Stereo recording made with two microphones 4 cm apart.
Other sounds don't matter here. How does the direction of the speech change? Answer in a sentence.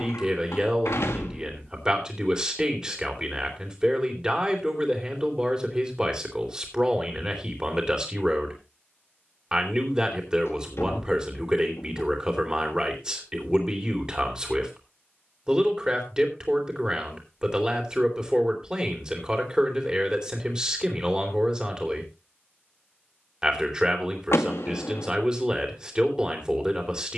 You can hear the speech stay put.